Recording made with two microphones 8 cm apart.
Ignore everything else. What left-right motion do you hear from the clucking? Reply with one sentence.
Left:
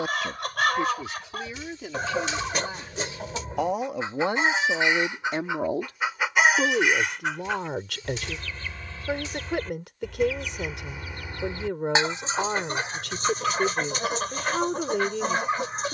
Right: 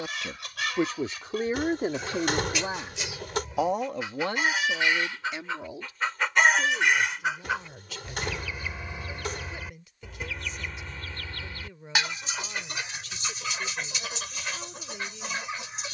You can hear the clucking go right and come back.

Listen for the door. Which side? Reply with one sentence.
You can hear the door on the right.